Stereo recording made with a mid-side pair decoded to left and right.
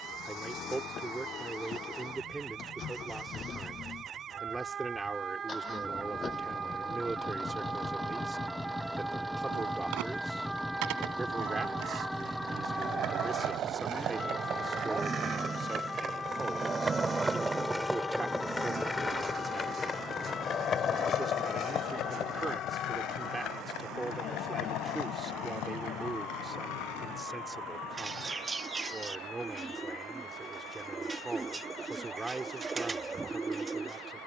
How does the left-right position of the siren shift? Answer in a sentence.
You can hear the siren move to the left.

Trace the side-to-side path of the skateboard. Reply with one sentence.
In this clip you hear the skateboard travel towards the left.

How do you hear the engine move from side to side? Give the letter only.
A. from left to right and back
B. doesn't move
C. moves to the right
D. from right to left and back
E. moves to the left
C.